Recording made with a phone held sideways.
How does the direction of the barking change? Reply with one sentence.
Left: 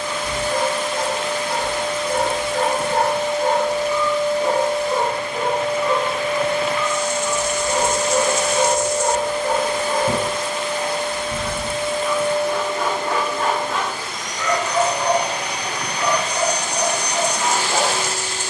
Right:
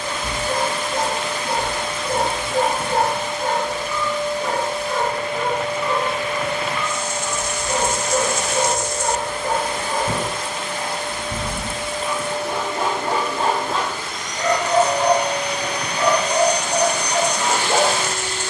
You can hear the barking go left and come back.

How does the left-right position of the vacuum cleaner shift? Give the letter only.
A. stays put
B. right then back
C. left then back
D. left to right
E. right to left
A.